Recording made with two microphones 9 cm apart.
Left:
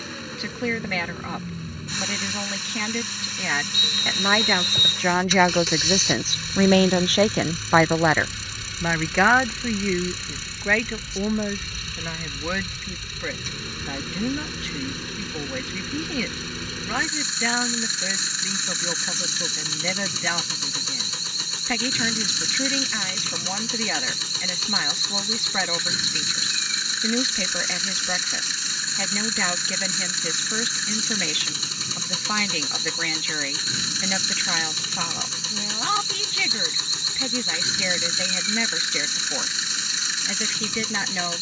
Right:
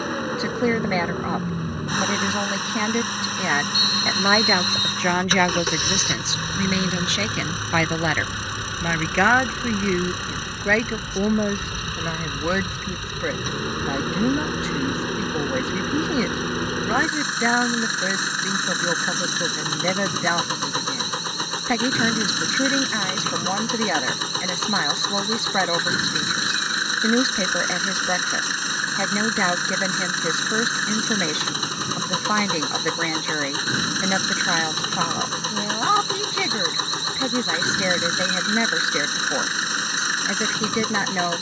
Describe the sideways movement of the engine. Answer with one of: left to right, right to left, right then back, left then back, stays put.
stays put.